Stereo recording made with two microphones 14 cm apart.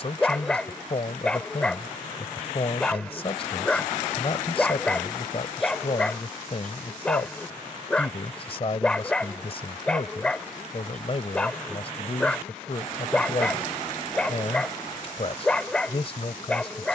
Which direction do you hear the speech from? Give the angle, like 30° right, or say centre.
40° left.